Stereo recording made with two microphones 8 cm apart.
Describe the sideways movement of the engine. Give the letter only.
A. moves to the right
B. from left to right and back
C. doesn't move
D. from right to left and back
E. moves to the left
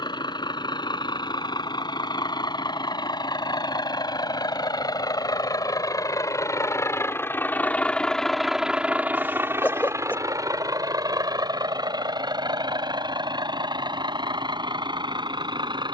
A.